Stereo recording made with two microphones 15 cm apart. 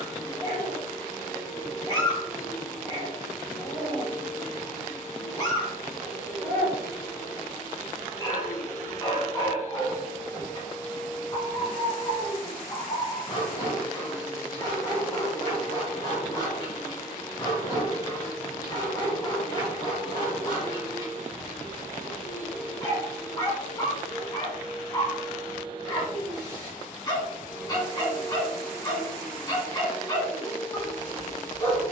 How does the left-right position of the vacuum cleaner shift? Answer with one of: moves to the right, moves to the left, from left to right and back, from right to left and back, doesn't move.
from left to right and back.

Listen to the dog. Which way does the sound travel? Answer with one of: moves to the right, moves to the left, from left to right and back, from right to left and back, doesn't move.
doesn't move.